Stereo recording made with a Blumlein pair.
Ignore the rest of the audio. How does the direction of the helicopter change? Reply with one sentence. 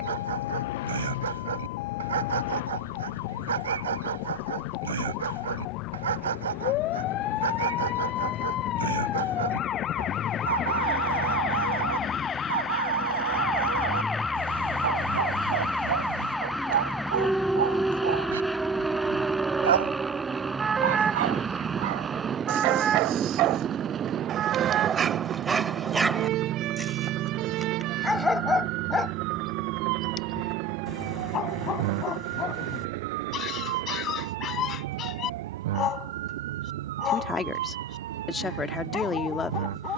In this clip you hear the helicopter move to the right.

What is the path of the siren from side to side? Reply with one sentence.
You can hear the siren go from the left side to the right.